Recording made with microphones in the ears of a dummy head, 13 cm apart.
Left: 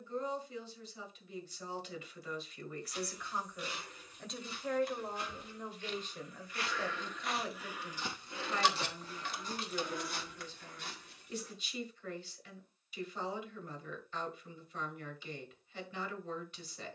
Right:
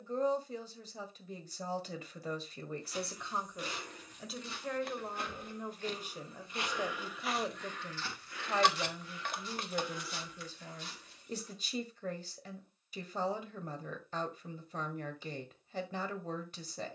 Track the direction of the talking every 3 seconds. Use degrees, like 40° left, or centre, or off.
40° right, 10° right, 20° right, 40° right, 40° right, 40° right.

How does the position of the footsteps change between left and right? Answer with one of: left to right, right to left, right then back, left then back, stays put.
right to left.